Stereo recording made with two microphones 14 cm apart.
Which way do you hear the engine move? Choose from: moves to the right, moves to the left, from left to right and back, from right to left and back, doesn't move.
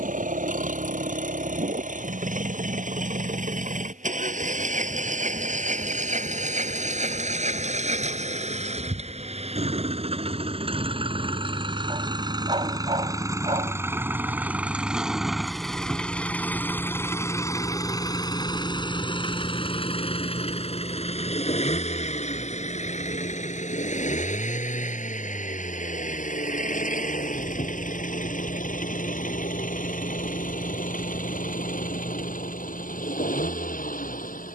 moves to the left.